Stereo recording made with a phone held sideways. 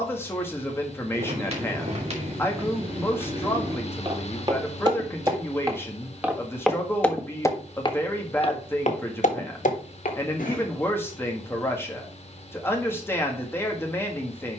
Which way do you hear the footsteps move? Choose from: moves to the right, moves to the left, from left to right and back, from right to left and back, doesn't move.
moves to the left.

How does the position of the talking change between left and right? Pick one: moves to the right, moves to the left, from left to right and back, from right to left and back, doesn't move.
doesn't move.